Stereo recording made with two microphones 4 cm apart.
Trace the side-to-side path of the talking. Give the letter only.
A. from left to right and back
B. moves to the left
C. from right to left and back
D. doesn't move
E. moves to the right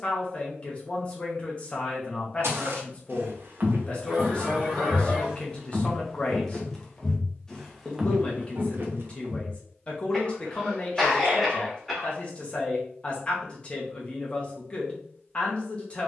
D.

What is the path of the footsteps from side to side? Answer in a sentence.
In this clip you hear the footsteps move from right to left and back again.